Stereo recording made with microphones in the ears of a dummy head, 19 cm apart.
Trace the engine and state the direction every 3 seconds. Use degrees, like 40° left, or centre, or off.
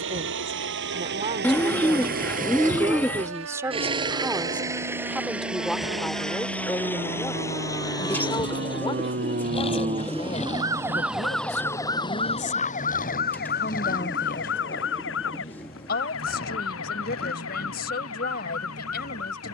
50° right, 20° right, 10° left, 30° left, 40° left, 50° left, 50° left.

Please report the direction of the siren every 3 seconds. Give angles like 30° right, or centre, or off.
80° right, 70° right, 60° right, 20° right, 50° left, 70° left, 70° left.